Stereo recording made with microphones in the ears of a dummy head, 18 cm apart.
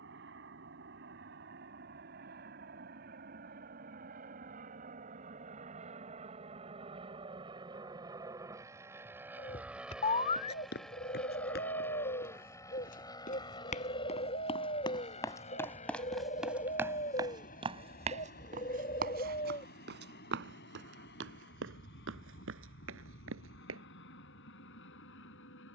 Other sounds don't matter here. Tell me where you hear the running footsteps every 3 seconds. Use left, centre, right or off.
off, off, off, left, left, centre, right, right, off.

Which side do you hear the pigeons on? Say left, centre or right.
left.